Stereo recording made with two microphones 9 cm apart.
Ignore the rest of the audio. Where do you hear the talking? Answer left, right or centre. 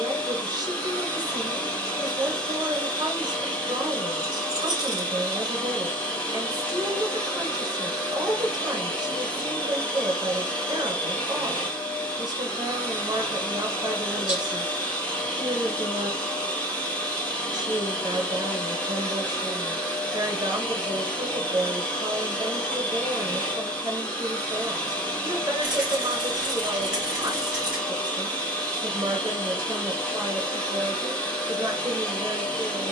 right.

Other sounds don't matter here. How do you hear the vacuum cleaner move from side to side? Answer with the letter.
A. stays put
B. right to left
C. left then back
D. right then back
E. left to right
A.